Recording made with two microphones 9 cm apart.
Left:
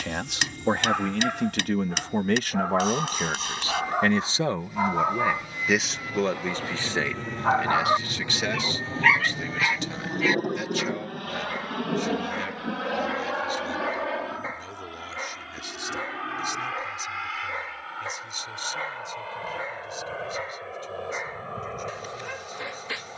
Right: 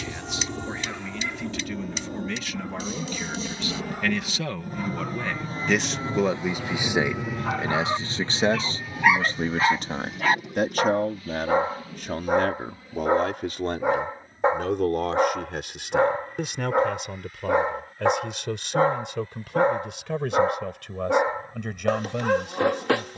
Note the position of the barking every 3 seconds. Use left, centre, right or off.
left, left, left, right, right, right, right, right.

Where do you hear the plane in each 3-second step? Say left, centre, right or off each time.
right, right, centre, left, left, left, left, left.